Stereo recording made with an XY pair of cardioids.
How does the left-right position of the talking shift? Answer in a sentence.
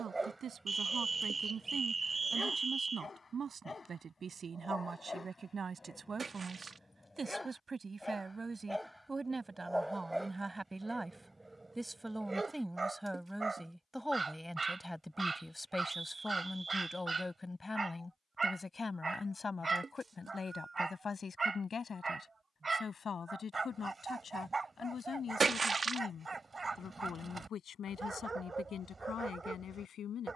In this clip you hear the talking move from right to left.